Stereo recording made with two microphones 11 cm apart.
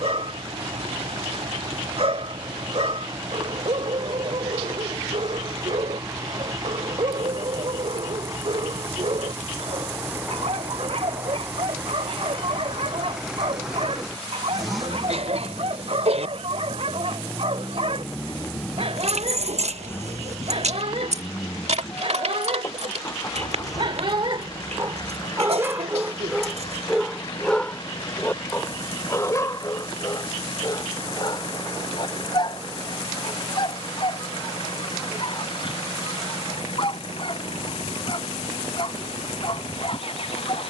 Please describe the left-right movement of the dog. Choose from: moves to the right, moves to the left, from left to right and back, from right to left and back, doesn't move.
moves to the left.